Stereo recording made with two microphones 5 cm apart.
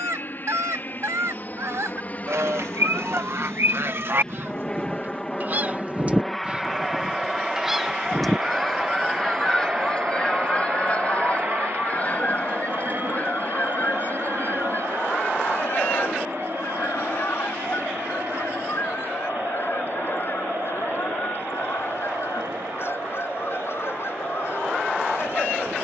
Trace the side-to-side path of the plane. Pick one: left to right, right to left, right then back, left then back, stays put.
left to right.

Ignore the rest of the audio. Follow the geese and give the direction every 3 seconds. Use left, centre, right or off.
right, right, centre, left, left, left, left, left, left.